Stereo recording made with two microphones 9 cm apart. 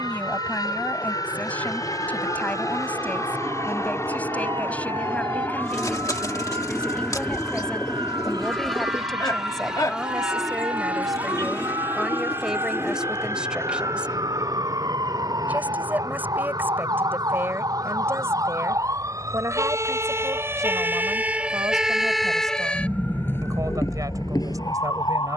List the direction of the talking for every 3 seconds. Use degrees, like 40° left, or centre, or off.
20° left, 20° left, 10° left, centre, 10° right, 20° right, 40° right, 40° right, 40° right.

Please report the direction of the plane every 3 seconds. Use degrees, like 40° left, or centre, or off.
50° left, 30° left, 10° left, 10° right, 30° right, 40° right, 50° right, 50° right, 60° right.